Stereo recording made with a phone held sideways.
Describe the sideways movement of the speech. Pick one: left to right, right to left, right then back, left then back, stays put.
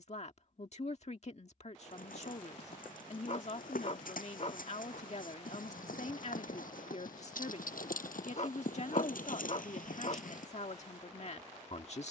stays put.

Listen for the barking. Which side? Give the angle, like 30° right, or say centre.
50° left.